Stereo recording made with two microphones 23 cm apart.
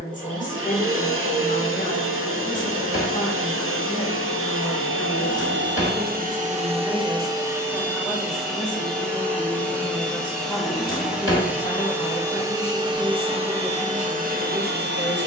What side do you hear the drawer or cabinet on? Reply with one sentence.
You can hear the drawer or cabinet on the left.